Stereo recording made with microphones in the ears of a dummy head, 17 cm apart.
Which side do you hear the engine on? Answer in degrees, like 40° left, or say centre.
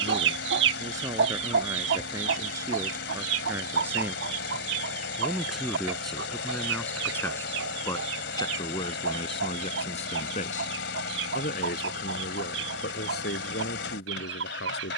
70° left.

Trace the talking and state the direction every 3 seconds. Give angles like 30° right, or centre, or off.
20° right, 10° right, 10° left, 40° left, 60° left.